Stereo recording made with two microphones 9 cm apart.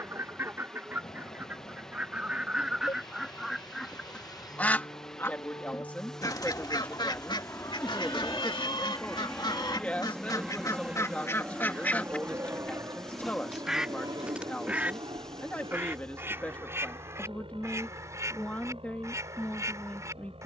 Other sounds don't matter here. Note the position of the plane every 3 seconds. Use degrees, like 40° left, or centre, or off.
60° left, 50° left, 30° left, 10° right, 40° right, 60° right, 70° right.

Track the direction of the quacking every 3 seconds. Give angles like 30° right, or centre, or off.
20° right, 10° left, 60° left, 40° left, centre, 30° right, 30° right.